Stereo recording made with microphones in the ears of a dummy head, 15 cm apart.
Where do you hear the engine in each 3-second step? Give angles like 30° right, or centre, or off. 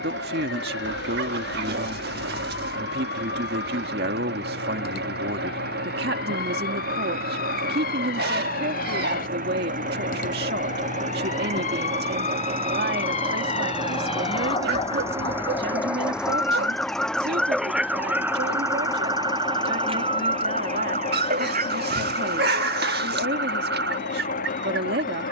70° right, 70° right, 60° right, 50° right, 30° right, centre, 20° left, 40° left, 50° left.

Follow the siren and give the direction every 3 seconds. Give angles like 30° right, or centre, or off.
70° left, 60° left, 60° left, 50° left, 40° left, 10° left, 30° right, 50° right, 70° right.